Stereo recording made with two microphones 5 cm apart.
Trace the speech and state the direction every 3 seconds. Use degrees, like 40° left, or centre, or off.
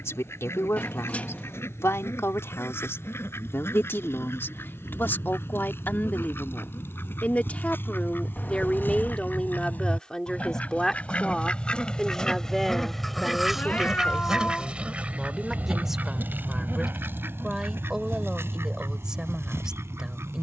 70° left, 50° left, 30° left, 10° left, centre, 10° right, 10° right.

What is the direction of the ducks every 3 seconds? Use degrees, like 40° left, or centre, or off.
60° left, 60° left, 50° left, 30° left, centre, 50° right, 70° right.